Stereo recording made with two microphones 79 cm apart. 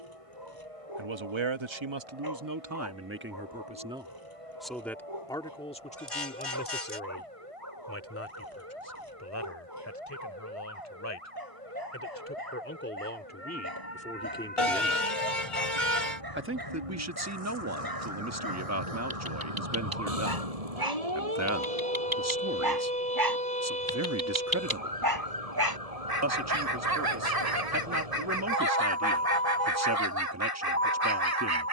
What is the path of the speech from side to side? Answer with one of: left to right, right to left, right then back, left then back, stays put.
left then back.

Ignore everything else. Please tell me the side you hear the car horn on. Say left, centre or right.
left.